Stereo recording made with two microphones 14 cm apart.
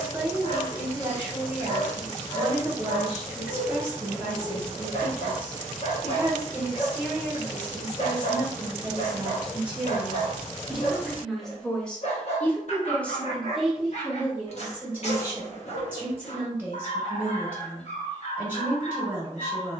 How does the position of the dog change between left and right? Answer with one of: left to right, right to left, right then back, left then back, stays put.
stays put.